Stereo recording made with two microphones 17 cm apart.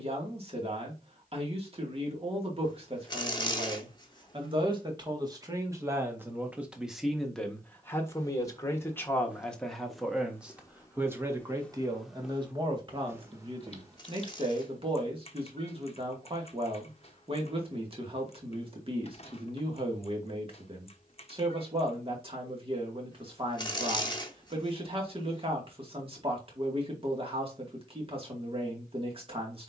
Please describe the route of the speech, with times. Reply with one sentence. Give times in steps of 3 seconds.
In this clip you hear the speech on the right from 0 s, in the centre from 6 s and on the right from 12 s.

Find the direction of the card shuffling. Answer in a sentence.
You can hear the card shuffling on the left.